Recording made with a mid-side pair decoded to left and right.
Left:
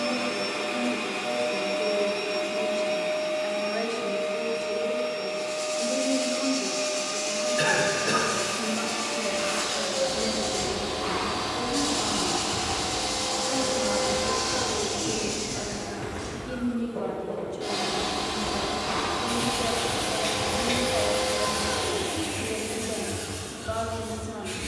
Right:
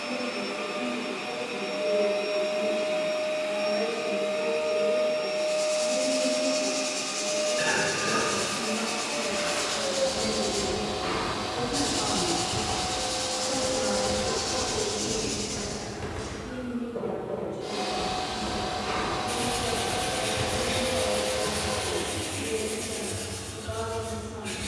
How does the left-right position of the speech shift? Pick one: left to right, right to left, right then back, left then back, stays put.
right then back.